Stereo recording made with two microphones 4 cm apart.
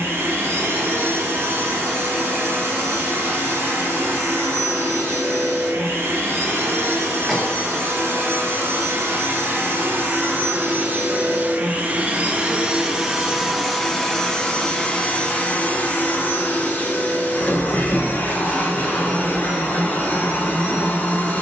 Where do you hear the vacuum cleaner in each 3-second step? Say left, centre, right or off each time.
right, right, right, right, centre, left, left.